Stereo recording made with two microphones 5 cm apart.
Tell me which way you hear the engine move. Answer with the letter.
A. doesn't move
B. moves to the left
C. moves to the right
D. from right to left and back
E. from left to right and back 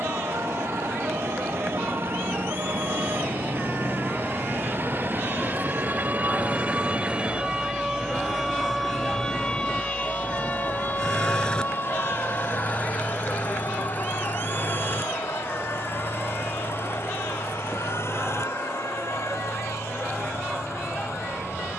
B.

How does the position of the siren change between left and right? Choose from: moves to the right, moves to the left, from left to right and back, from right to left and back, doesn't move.
moves to the left.